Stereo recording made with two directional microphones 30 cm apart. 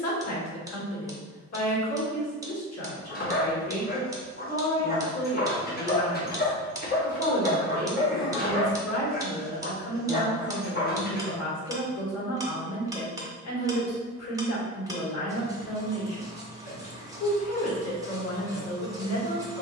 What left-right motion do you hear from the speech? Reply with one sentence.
You can hear the speech stay in one place.